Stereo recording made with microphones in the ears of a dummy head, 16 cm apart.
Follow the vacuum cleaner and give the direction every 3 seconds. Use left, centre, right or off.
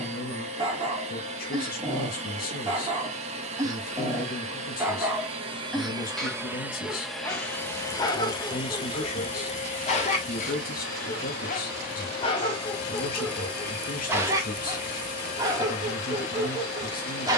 right, right, centre, left, left, left.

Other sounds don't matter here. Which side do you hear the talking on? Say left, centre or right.
left.